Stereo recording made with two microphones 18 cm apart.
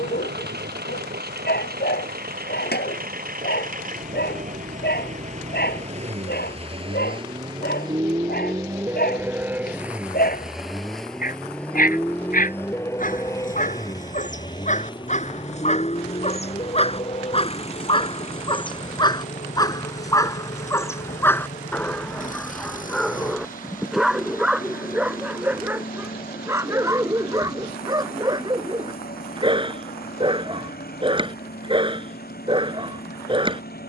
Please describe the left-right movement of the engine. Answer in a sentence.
In this clip you hear the engine travel towards the left.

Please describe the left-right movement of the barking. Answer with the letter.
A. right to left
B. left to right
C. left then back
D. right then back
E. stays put
B.